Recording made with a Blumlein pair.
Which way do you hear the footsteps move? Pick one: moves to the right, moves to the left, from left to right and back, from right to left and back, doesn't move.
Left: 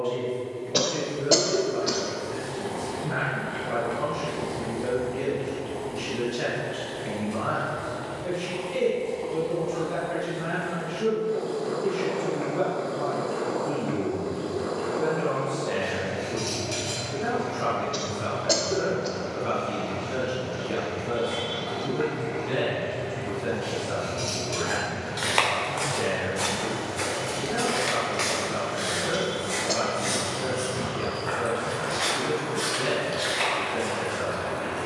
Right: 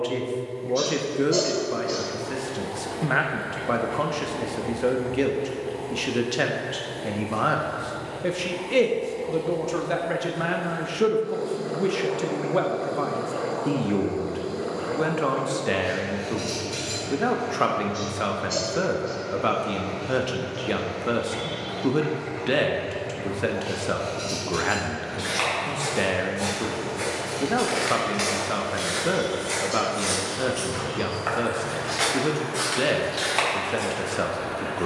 moves to the right.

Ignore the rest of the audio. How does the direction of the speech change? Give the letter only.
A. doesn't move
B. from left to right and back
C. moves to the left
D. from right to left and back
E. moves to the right
A.